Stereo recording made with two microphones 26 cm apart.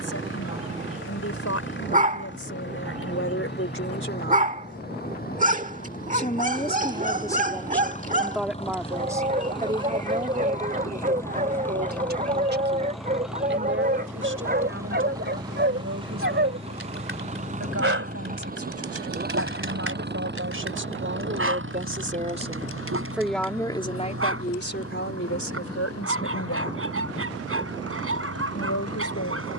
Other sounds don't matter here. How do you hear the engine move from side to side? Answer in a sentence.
In this clip you hear the engine travel towards the right.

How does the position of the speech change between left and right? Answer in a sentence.
You can hear the speech go right and come back.